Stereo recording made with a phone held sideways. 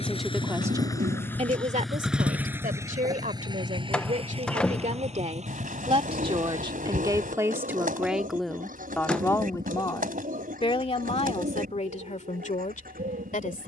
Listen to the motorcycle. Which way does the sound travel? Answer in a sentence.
You can hear the motorcycle travel towards the right.